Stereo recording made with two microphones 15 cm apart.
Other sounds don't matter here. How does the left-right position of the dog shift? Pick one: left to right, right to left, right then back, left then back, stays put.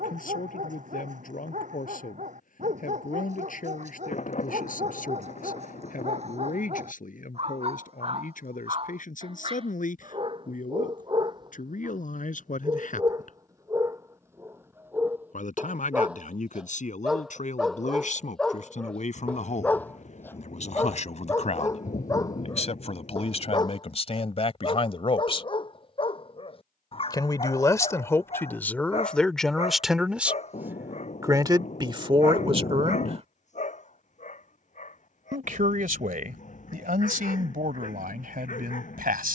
right to left.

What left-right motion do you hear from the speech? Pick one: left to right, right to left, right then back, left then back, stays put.
left to right.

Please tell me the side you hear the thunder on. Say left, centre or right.
left.